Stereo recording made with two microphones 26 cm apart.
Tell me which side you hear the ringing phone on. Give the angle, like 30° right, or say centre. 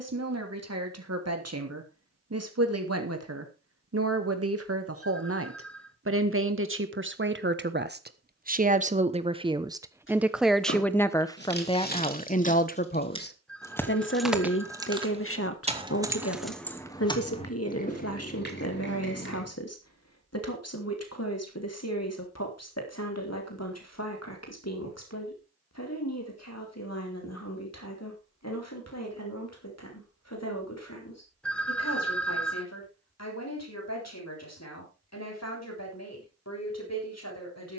centre.